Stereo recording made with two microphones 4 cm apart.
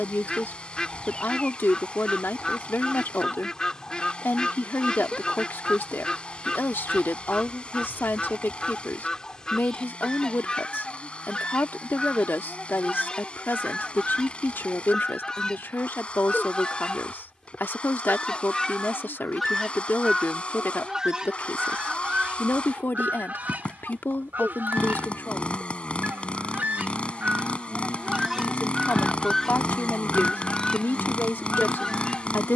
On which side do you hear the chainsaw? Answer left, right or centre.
left.